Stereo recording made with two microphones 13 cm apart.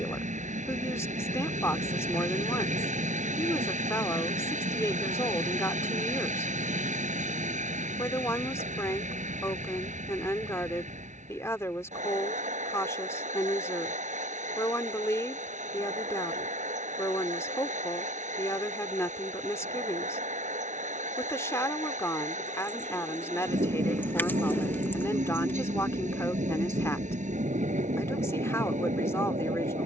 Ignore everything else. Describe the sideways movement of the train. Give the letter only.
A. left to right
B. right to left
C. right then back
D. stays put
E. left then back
D.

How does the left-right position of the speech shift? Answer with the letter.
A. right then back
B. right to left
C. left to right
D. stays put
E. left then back
D.